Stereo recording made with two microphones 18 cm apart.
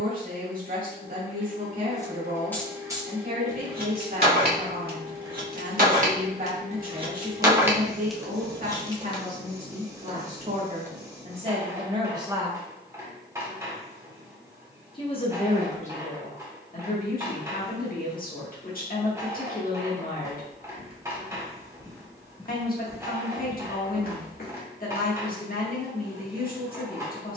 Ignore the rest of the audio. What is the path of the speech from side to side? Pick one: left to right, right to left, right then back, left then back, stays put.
right to left.